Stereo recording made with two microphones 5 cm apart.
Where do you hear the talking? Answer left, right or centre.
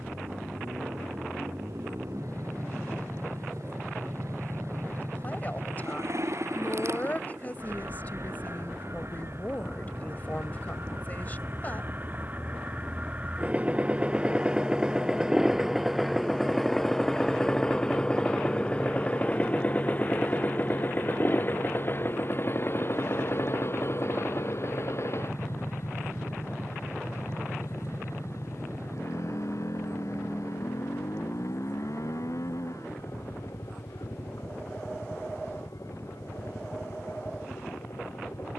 left.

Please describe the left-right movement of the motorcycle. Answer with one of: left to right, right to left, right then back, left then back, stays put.
right to left.